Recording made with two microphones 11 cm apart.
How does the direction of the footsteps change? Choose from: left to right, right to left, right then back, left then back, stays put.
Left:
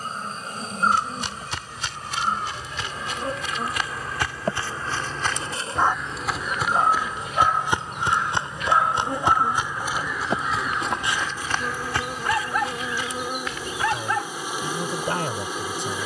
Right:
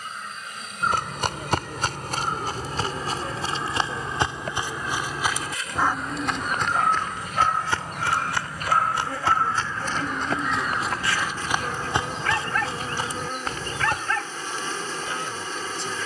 left then back.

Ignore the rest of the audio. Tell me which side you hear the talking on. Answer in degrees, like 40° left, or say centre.
50° left.